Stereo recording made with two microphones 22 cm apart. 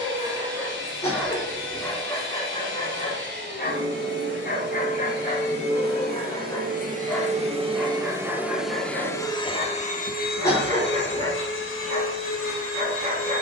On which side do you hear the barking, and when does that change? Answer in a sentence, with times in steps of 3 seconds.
In this clip you hear the barking in the centre from 0 s, on the left from 3 s, in the centre from 6 s and on the right from 9 s.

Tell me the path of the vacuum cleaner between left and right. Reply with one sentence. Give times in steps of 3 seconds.
You can hear the vacuum cleaner on the right from 0 s and on the left from 9 s.